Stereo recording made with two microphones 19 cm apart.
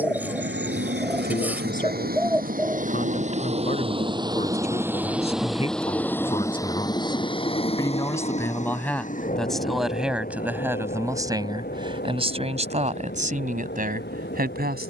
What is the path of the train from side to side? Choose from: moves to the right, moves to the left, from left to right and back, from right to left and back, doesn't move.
moves to the left.